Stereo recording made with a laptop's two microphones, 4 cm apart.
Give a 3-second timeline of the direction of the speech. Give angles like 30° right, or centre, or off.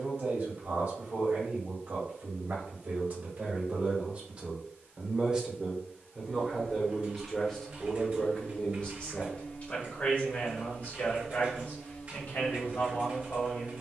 40° right, 30° right, 10° left, 40° left, 50° left.